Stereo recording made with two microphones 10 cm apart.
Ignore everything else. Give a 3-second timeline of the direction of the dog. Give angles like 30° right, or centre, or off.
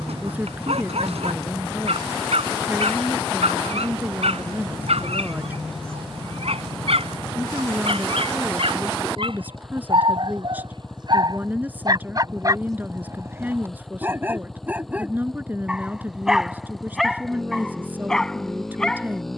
80° right, 80° right, 70° right, 50° right, 20° right, centre, 10° left.